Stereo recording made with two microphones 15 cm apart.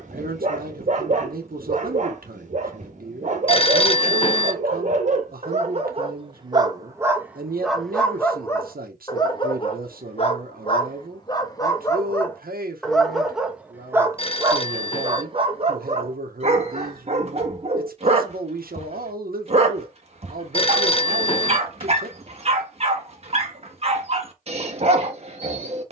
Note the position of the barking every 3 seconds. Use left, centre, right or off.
right, right, centre, left, centre, right, right, right, right.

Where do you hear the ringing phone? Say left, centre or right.
left.